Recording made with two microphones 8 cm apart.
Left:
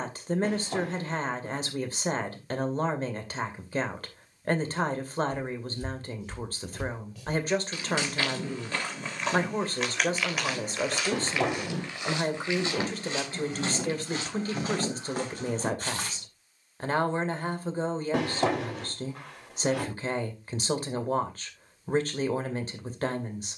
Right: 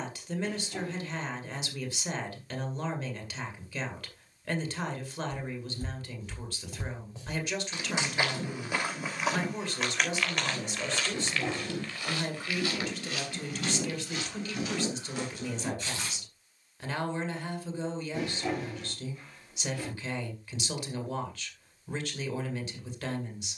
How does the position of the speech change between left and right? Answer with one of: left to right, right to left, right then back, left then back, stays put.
stays put.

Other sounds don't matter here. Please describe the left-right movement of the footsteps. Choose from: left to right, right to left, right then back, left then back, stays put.
right to left.